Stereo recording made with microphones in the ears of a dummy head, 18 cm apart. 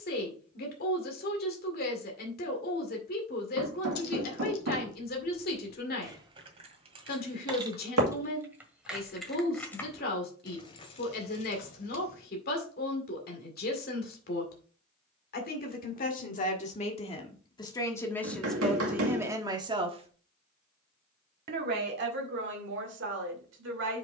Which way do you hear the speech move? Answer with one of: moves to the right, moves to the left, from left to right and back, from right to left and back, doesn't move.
moves to the right.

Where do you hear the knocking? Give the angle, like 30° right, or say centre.
80° right.